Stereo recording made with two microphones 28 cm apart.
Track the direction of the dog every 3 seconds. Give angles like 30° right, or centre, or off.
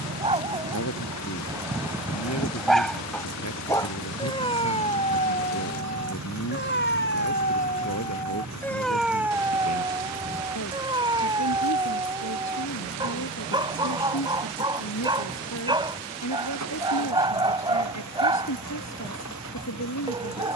10° right, 20° left, 30° left, 10° right, 20° right, 20° right, 20° right.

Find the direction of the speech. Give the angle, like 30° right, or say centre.
70° left.